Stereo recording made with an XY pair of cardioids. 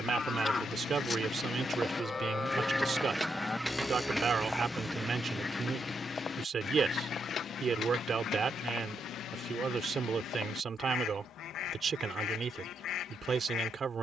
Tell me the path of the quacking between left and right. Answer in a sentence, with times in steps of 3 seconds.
In this clip you hear the quacking on the left from 0 s, in the centre from 3 s and on the left from 6 s.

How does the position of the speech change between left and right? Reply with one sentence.
You can hear the speech stay put.